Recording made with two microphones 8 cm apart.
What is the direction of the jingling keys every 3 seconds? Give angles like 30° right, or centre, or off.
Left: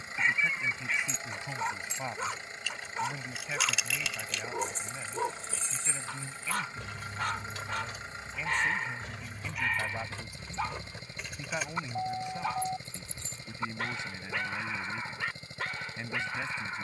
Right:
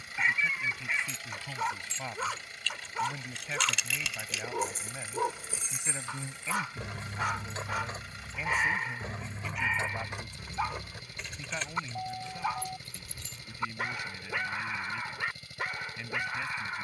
20° left, 10° right, 30° right, 10° right, 20° left, off.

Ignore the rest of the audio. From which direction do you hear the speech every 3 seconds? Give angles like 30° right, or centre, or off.
10° left, 10° right, 10° right, 10° left, 20° left, 20° left.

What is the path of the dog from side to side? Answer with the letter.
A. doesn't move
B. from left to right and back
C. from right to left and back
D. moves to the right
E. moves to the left
A.